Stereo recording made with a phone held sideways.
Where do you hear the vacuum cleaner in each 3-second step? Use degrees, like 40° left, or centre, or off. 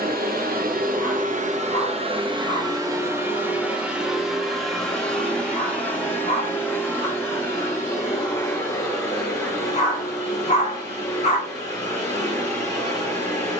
50° right, centre, 20° left, 20° left, 20° left.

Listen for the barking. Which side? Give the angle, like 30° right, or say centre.
50° left.